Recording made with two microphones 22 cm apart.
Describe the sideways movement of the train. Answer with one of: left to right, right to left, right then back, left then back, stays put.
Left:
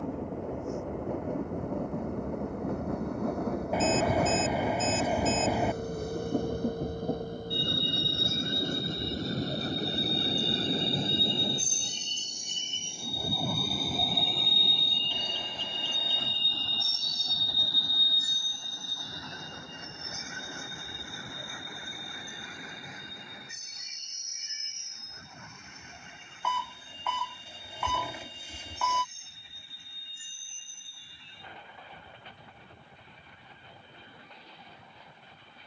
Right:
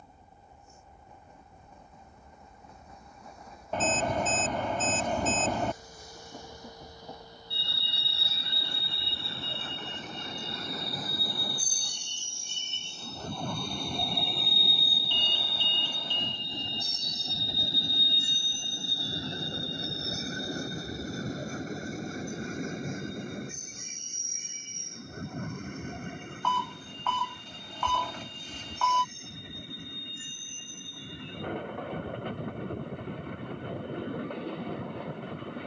left to right.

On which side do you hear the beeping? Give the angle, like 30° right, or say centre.
10° left.